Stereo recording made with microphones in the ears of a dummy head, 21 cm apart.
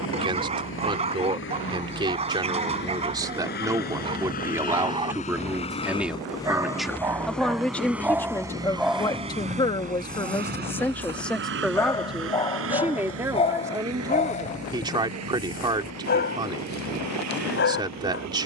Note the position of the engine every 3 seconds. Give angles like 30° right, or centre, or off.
50° left, 40° left, centre, 40° right, 60° right, 70° right.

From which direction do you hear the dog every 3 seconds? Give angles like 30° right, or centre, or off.
30° right, 20° right, 10° right, 10° left, 30° left, 40° left.